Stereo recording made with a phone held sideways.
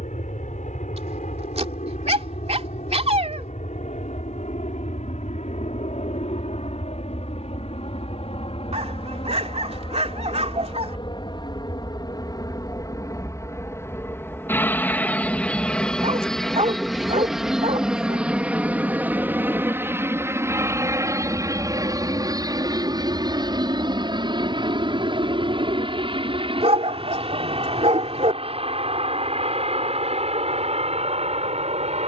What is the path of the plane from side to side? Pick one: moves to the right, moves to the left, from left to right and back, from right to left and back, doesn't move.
moves to the right.